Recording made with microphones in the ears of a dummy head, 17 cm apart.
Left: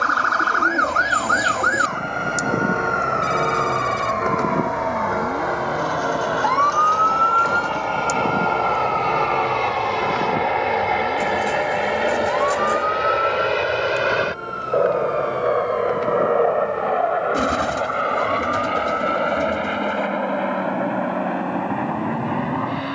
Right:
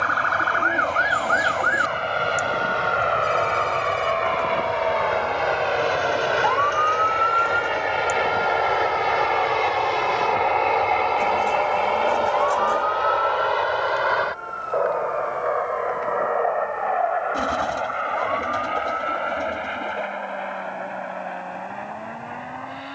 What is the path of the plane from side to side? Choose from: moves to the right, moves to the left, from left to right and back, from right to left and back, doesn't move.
moves to the left.